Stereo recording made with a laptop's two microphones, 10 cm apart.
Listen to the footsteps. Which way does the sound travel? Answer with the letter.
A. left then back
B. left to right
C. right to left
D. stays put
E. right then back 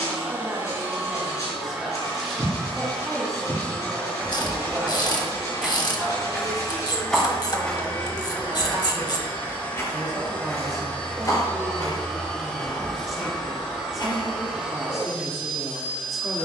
C.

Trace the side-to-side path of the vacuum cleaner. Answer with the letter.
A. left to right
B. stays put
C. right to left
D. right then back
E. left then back
E.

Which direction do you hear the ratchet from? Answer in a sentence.
You can hear the ratchet on the left.